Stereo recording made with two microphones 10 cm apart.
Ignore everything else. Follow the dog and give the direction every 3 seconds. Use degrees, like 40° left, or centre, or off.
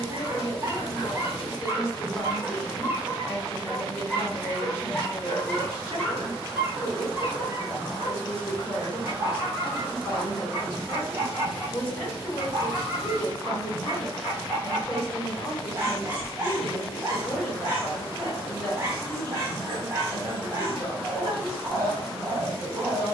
30° right, centre, 20° right, 30° right, 30° right, 30° right, 30° right, 30° right.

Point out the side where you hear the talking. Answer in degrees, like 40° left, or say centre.
30° left.